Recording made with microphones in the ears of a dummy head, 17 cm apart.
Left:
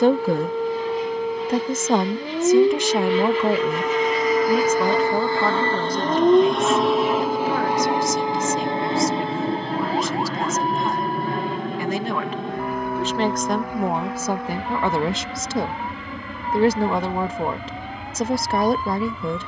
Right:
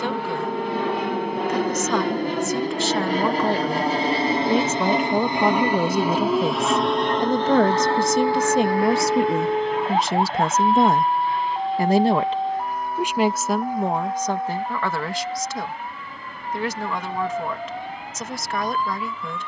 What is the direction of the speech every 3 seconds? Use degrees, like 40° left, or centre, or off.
20° left, 10° right, 40° right, 50° right, centre, 30° left, 30° left.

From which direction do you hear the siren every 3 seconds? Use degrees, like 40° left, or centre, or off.
70° left, 40° left, centre, 30° right, 50° right, 50° right, 60° right.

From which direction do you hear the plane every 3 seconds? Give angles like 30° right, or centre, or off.
50° right, 20° right, 10° left, 30° left, 50° left, 60° left, 60° left.